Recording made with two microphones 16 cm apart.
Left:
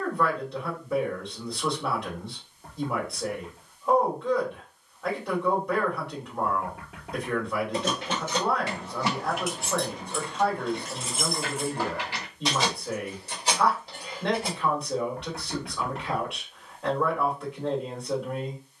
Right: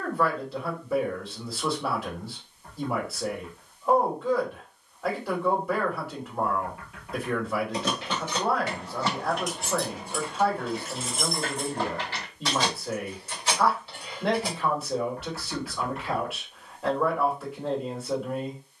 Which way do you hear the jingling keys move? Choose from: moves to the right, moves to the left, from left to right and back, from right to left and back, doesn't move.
from left to right and back.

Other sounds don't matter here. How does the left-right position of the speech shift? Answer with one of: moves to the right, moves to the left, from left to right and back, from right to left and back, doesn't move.
doesn't move.